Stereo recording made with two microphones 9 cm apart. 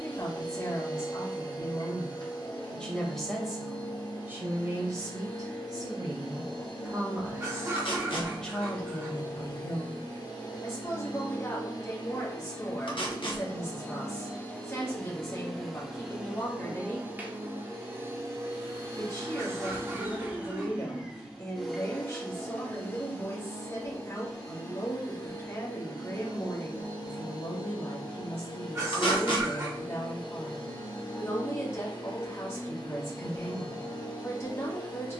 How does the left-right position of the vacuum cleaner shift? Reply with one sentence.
In this clip you hear the vacuum cleaner move from left to right and back again.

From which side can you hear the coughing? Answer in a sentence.
You can hear the coughing on the right.